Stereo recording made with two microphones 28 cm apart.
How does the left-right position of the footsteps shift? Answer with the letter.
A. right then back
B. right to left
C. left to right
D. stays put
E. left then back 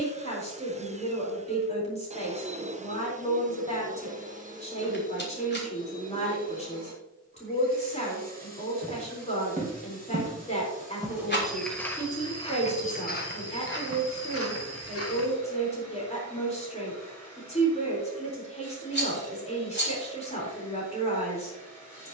B.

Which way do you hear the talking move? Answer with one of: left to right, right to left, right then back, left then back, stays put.
stays put.